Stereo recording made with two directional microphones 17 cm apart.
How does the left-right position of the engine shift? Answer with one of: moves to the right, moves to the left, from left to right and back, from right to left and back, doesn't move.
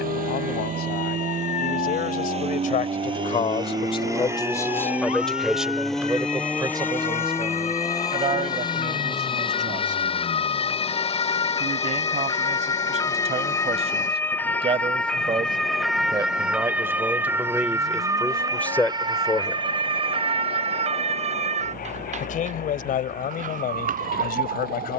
moves to the left.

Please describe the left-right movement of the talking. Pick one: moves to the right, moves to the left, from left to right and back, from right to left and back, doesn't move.
from left to right and back.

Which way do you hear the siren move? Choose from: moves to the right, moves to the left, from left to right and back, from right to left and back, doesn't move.
moves to the right.